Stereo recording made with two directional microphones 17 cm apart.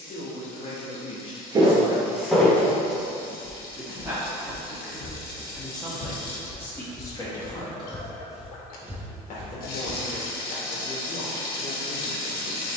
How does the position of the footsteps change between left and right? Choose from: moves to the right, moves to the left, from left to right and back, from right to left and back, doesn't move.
from right to left and back.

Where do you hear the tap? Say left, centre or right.
left.